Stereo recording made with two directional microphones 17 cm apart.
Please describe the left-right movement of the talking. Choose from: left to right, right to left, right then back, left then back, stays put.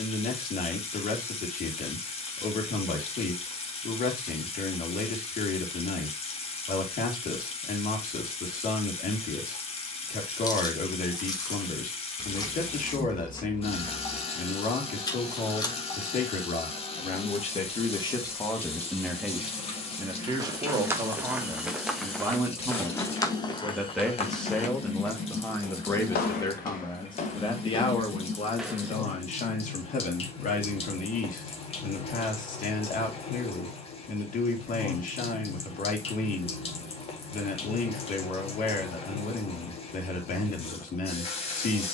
right then back.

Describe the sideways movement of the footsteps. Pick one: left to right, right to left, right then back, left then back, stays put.
left then back.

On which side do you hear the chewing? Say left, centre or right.
left.